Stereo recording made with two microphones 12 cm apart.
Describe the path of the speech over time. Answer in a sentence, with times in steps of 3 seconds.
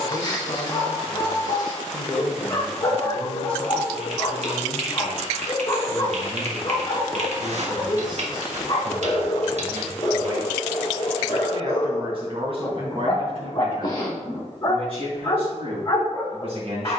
In this clip you hear the speech on the left from 0 s, in the centre from 3 s and on the right from 6 s.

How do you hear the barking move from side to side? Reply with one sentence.
You can hear the barking stay in one place.